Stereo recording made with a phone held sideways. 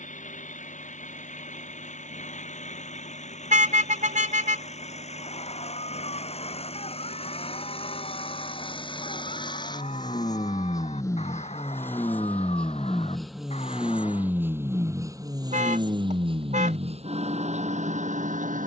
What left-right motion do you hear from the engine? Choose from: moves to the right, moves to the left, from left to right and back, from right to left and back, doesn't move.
moves to the right.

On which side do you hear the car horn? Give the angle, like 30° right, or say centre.
50° right.